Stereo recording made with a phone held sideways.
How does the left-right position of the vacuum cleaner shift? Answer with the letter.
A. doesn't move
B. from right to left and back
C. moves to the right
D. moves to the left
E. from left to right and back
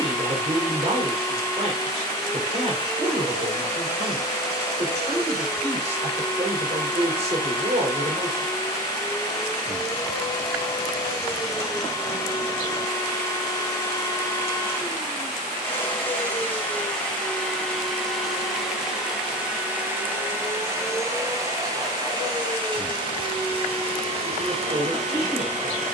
C.